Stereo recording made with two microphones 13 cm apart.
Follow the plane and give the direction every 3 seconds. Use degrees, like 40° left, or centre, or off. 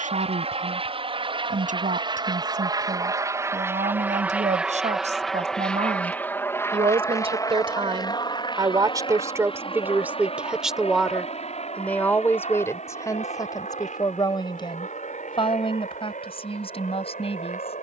40° right, 10° right, 30° left, 50° left, 60° left, 60° left.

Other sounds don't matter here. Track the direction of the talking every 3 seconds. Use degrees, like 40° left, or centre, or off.
80° right, 60° right, 40° right, 10° right, 30° left, 50° left.